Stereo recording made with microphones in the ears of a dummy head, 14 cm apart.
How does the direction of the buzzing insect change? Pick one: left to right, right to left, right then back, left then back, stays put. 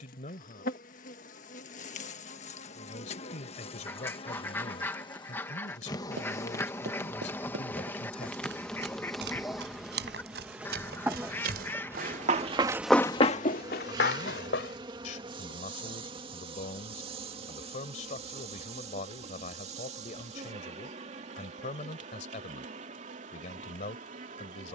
left to right.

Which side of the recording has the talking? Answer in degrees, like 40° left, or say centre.
50° left.